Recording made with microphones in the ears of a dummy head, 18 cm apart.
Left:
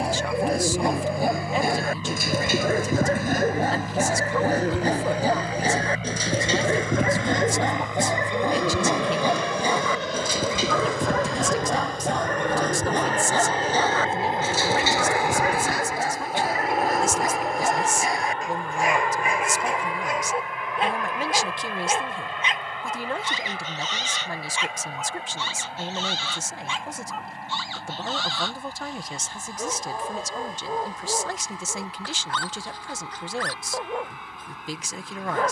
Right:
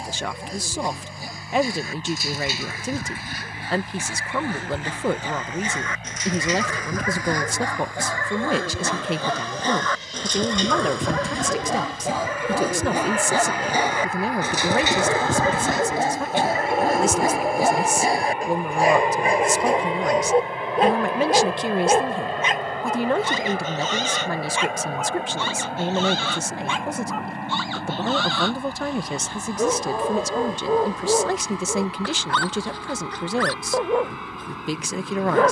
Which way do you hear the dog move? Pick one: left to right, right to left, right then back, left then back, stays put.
left to right.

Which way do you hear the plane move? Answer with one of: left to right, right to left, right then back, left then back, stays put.
left to right.